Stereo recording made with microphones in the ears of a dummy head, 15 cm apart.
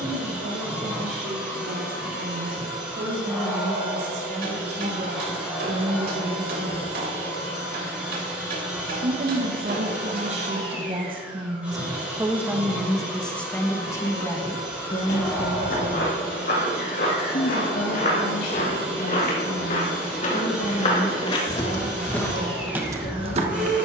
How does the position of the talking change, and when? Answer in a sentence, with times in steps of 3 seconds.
In this clip you hear the talking on the right from 0 s, in the centre from 12 s and on the left from 15 s.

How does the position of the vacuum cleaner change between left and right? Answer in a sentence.
In this clip you hear the vacuum cleaner stay put.